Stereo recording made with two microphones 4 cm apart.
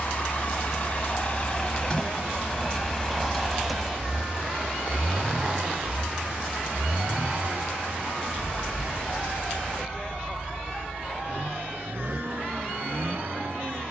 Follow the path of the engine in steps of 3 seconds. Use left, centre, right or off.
left, centre, right, right, right.